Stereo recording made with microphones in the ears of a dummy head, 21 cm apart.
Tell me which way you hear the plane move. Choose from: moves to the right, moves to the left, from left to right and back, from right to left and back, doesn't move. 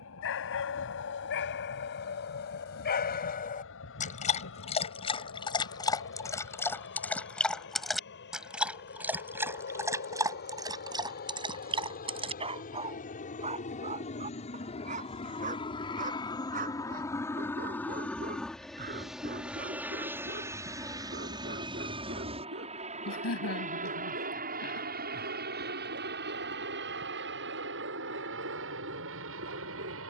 moves to the right.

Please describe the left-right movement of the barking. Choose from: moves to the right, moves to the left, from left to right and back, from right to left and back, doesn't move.
moves to the right.